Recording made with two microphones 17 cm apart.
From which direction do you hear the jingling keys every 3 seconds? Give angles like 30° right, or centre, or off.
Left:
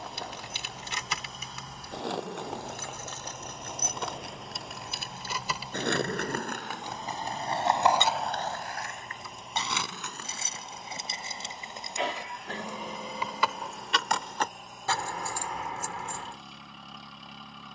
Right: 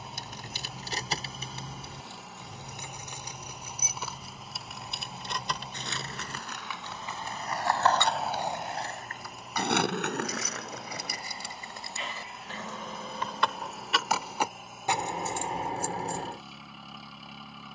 30° right, centre, 20° left, 30° left, centre, 30° right.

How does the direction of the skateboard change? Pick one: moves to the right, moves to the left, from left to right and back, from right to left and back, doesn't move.
moves to the right.